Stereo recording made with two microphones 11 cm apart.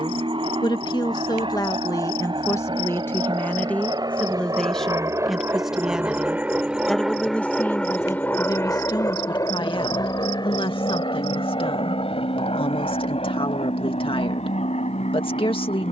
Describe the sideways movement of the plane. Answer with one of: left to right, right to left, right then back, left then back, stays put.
right to left.